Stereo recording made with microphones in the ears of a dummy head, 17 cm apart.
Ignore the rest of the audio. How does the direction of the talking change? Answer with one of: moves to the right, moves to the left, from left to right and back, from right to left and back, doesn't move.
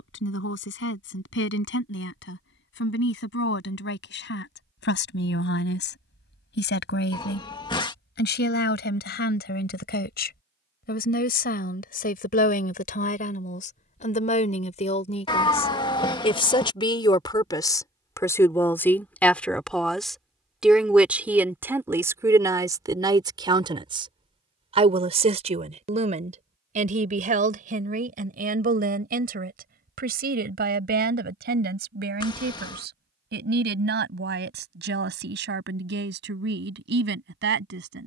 moves to the right.